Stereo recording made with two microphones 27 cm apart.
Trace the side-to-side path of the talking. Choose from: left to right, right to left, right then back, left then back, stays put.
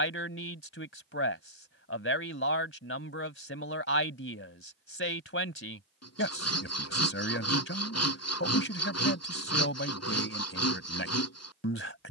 stays put.